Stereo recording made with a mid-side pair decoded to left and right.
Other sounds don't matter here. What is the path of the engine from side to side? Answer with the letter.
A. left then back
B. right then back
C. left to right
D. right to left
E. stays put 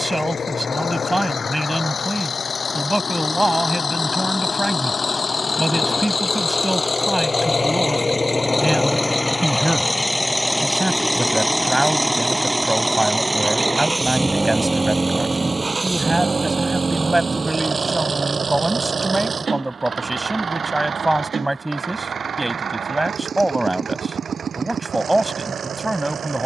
C.